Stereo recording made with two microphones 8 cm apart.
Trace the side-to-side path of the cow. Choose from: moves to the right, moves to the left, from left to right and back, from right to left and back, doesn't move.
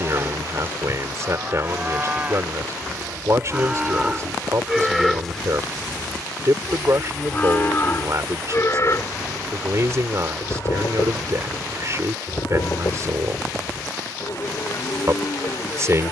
moves to the left.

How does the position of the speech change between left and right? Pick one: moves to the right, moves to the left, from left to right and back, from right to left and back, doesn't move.
doesn't move.